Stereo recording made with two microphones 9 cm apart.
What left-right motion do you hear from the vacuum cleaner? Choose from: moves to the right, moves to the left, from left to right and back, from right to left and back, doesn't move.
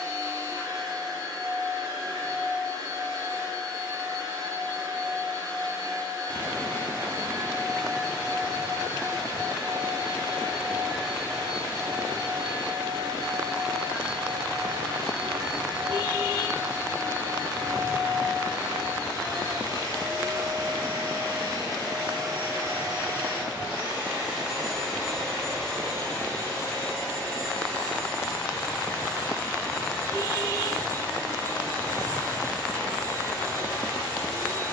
moves to the left.